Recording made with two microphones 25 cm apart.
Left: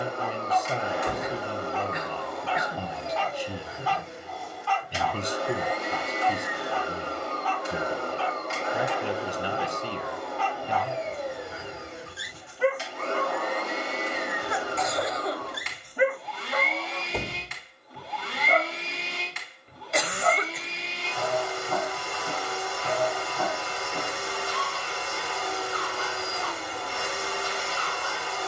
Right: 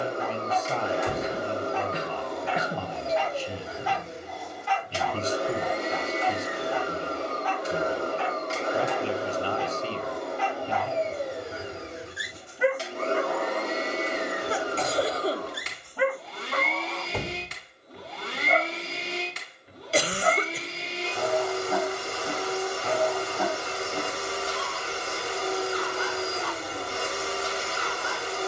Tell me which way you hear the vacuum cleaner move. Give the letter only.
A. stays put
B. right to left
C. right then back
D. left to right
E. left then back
A.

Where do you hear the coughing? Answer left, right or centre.
right.